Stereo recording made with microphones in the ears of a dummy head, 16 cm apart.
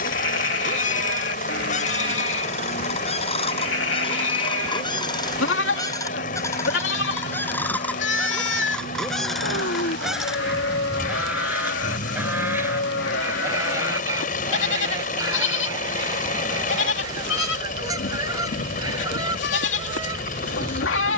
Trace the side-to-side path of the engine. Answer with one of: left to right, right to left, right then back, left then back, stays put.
stays put.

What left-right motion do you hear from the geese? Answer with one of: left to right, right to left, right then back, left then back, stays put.
left to right.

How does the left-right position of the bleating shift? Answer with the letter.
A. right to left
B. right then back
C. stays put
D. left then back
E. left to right
C.